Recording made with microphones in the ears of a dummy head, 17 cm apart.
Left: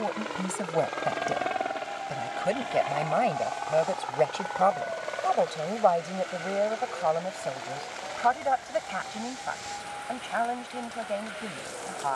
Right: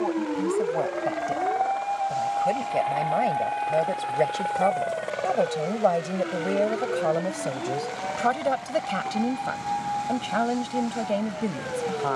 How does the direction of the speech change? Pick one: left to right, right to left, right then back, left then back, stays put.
left to right.